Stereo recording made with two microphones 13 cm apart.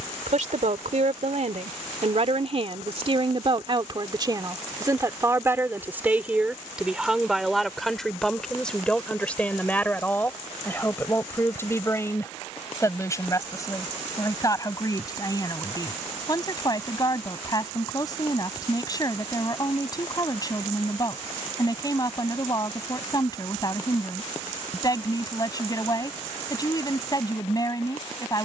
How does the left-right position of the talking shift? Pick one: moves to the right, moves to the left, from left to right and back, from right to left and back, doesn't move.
moves to the left.